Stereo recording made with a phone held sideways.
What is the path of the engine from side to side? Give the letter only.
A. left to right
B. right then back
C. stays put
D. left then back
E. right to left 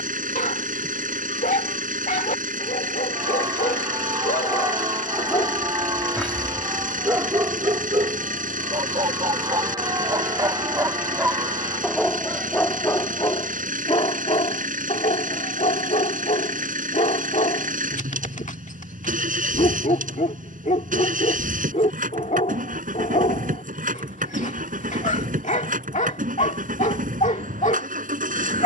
C.